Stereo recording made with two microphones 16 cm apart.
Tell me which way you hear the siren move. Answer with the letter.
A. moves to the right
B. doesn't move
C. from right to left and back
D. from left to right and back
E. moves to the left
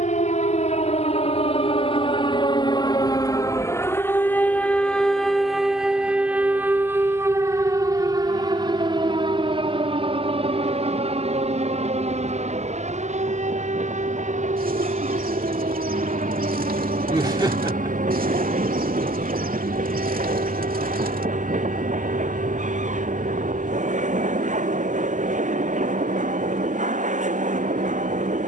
A.